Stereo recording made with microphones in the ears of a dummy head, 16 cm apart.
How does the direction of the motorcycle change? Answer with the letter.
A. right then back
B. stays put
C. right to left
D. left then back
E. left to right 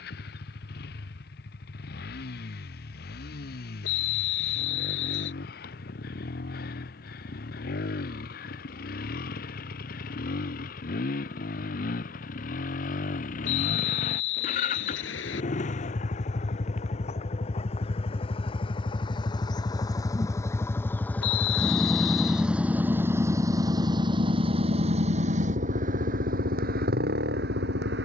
E.